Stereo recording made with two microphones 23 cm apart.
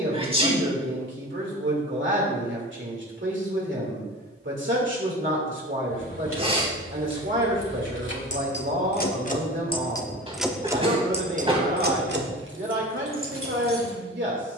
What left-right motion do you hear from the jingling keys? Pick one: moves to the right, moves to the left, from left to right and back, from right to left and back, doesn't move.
moves to the right.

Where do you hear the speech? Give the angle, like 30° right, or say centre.
50° right.